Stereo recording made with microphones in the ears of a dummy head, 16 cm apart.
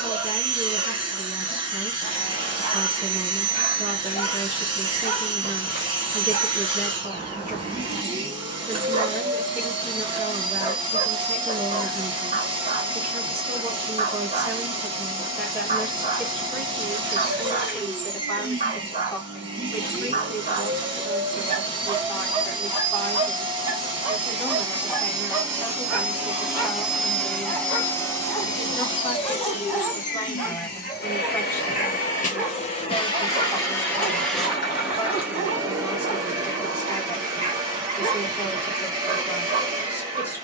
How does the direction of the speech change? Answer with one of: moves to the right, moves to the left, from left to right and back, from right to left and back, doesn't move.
moves to the left.